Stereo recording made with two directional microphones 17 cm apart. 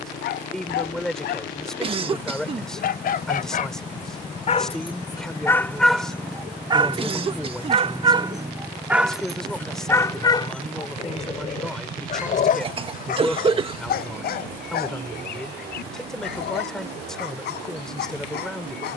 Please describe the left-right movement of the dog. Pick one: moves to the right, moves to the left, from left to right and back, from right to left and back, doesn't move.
from left to right and back.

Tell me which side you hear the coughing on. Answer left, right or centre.
right.